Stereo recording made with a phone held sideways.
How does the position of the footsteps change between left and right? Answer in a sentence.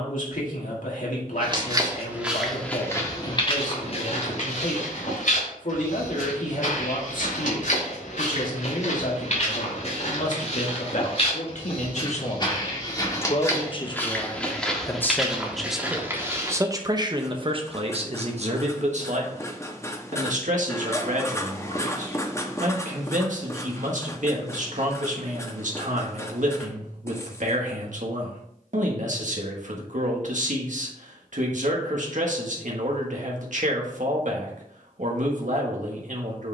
You can hear the footsteps go left and come back.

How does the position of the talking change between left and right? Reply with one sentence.
You can hear the talking move from left to right.